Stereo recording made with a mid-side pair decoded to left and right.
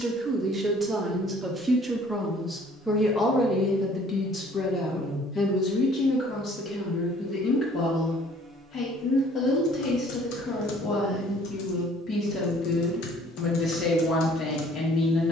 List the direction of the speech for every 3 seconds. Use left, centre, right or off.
centre, left, left, left, left.